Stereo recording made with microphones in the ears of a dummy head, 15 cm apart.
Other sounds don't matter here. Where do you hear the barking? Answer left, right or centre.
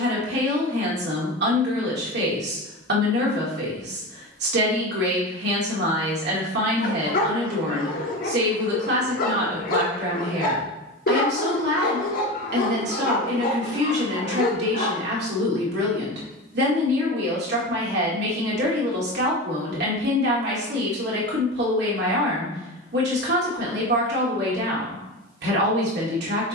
left.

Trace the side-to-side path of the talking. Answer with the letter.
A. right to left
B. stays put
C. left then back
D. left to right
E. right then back
B.